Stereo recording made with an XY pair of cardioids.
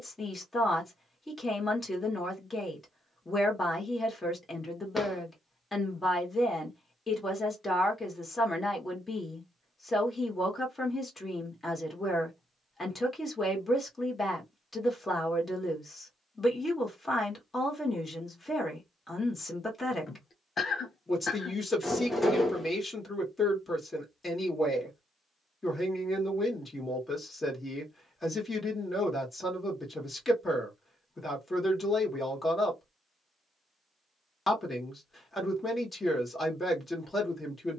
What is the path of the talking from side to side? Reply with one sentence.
You can hear the talking stay in one place.